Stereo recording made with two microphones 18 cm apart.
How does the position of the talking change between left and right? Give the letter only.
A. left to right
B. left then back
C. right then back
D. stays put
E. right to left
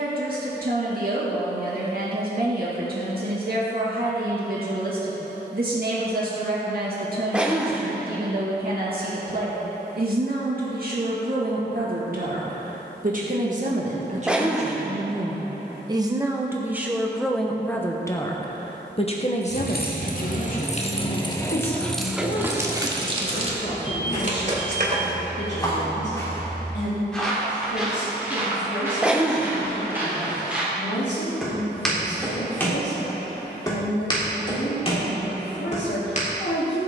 E.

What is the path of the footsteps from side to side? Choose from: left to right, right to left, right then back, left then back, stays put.
right then back.